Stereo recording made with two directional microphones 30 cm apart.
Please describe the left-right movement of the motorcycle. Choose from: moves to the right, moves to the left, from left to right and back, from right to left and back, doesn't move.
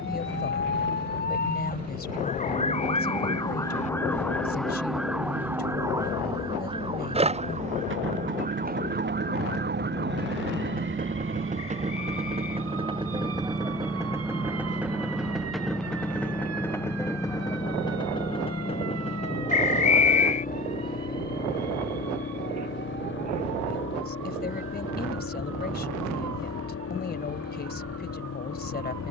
moves to the left.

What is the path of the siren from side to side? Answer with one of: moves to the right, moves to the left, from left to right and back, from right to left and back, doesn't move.
moves to the right.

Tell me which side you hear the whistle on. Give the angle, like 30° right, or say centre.
20° left.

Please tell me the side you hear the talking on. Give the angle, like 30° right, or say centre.
30° left.